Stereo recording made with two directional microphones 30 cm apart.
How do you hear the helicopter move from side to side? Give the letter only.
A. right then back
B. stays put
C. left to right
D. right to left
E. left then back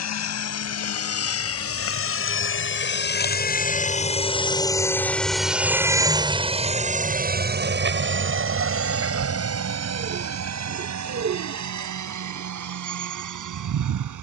C.